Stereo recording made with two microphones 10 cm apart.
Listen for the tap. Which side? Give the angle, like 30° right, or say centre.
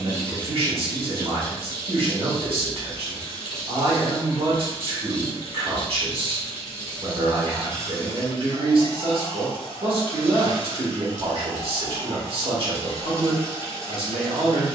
50° left.